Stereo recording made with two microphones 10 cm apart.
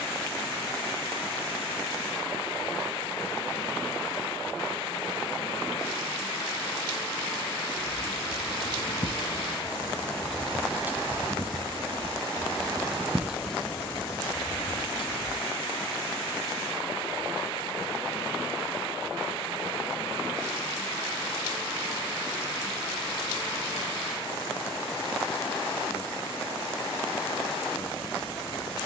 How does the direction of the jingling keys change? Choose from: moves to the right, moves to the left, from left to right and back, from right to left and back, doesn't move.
from left to right and back.